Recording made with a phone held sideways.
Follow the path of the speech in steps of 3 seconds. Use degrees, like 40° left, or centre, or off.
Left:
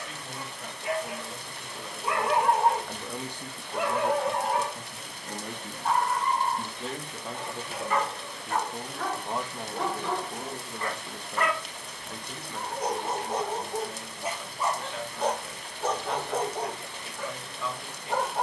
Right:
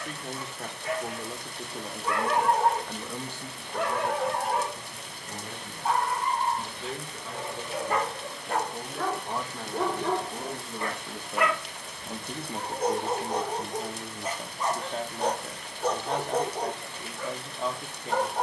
40° right, 30° left, 30° left, 10° left, 30° right, 40° right.